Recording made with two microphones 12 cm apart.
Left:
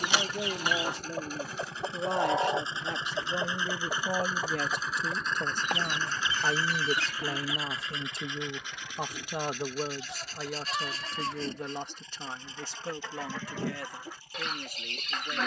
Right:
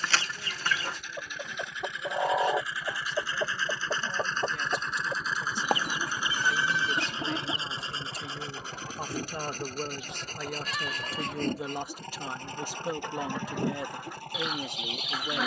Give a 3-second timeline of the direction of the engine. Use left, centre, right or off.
left, centre, right, right, right.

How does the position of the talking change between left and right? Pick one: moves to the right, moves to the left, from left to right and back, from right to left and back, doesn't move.
moves to the right.